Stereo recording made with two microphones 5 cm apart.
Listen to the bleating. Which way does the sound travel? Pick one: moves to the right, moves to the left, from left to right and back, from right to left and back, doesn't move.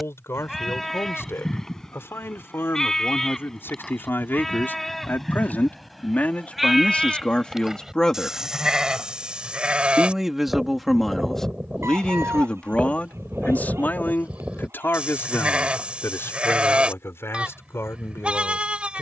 moves to the right.